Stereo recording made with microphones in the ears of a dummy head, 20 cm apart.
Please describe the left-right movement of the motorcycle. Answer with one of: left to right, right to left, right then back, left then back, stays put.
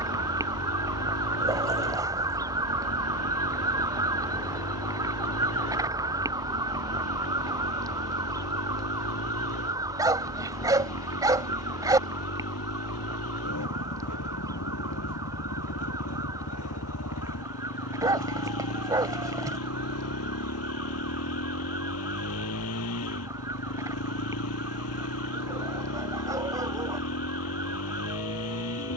stays put.